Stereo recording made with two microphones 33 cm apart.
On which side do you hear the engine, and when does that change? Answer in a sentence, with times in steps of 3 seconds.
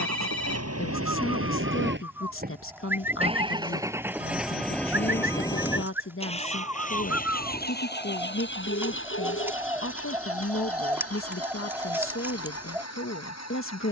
In this clip you hear the engine on the right from 0 s, in the centre from 3 s and on the left from 6 s.